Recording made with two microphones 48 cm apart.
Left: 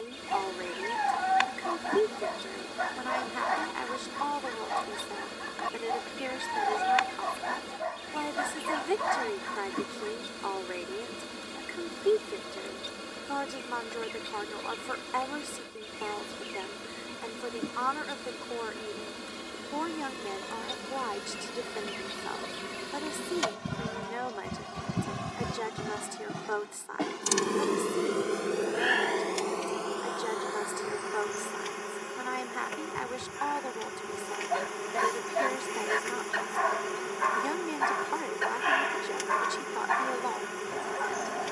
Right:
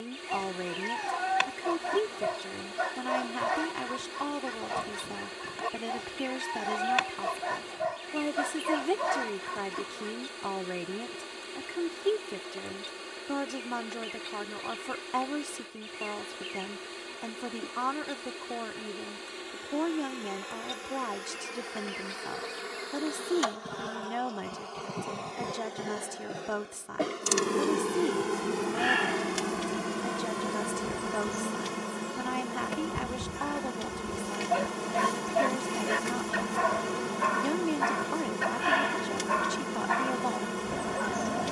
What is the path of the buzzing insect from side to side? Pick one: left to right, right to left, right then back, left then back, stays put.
left to right.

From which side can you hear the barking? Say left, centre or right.
right.